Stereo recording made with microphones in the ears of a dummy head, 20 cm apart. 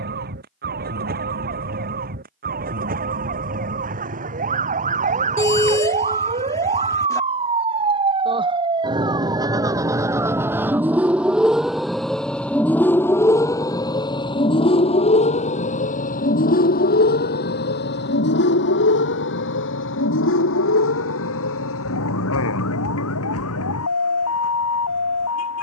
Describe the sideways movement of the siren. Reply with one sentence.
In this clip you hear the siren move from right to left.